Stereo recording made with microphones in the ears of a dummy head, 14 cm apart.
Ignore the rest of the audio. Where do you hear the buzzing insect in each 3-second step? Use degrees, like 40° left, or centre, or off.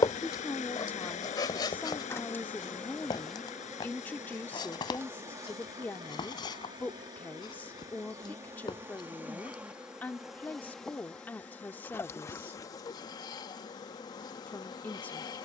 20° left, 10° right, 20° right, centre, 20° left.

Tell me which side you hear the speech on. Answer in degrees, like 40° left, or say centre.
10° left.